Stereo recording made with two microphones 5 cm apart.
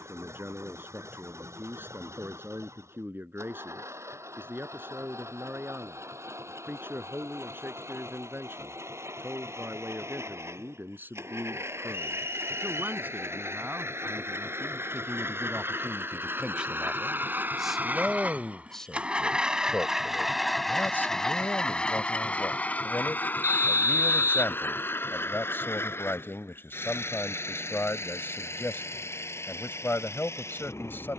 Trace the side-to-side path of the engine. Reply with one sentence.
You can hear the engine go from the right side to the left.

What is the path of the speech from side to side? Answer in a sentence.
In this clip you hear the speech move to the left.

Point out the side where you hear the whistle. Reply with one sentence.
You can hear the whistle on the right.